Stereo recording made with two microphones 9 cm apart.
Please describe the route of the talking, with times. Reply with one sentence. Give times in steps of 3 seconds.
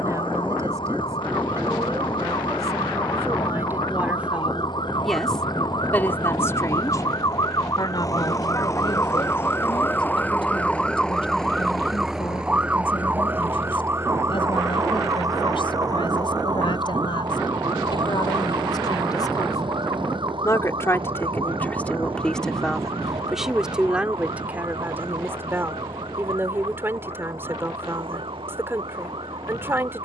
You can hear the talking on the right from 0 s, in the centre from 3 s, on the left from 6 s, in the centre from 21 s and on the right from 24 s.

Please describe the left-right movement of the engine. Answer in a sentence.
You can hear the engine travel towards the right.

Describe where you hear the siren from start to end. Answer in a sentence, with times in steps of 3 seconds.
You can hear the siren on the left from 0 s, in the centre from 9 s and on the right from 12 s.